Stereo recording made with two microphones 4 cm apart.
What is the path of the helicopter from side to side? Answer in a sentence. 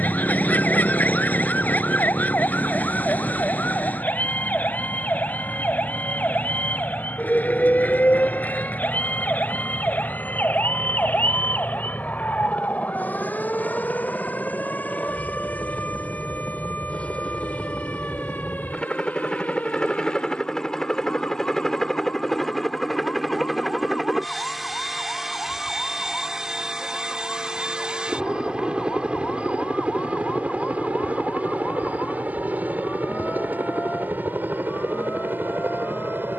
In this clip you hear the helicopter go from the left side to the right.